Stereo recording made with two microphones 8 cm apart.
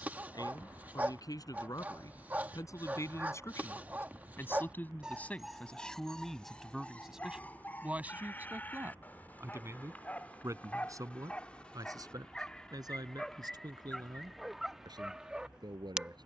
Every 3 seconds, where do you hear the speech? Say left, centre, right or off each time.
left, left, centre, right, right, right.